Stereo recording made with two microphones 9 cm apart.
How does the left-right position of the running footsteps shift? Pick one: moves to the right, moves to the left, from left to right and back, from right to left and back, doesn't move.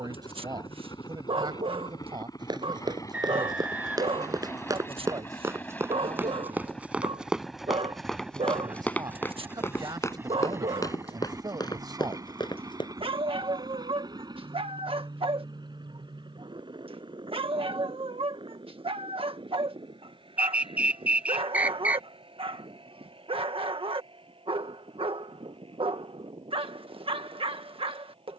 moves to the left.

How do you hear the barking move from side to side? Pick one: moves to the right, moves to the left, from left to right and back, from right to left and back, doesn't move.
doesn't move.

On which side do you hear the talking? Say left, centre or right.
right.